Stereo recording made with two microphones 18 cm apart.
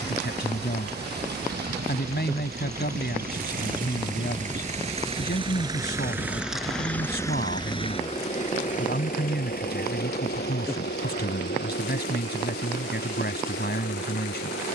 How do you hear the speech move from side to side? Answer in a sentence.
You can hear the speech stay put.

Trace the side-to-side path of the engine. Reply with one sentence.
You can hear the engine move from right to left.